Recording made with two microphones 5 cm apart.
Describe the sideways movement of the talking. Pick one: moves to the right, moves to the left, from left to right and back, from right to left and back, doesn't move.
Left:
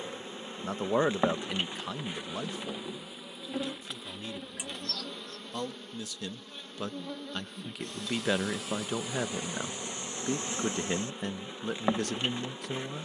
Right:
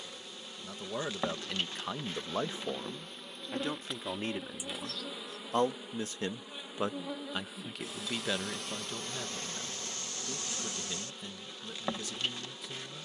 from left to right and back.